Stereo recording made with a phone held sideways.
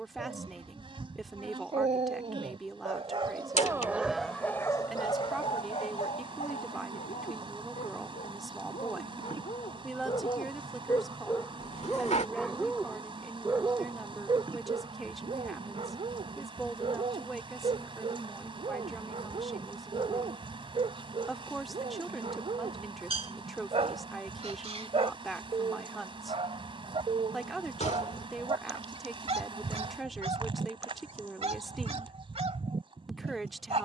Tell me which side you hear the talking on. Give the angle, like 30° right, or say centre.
centre.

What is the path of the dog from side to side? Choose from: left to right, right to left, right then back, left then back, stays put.
left then back.